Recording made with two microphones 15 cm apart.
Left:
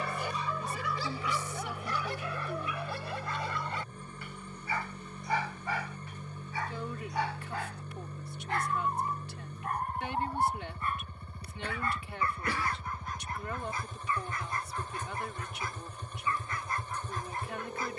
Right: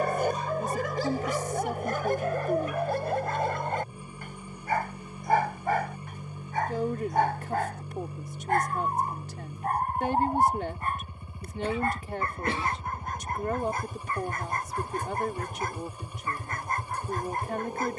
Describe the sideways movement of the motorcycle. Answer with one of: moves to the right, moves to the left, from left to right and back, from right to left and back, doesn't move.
doesn't move.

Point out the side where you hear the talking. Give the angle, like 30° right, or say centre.
40° right.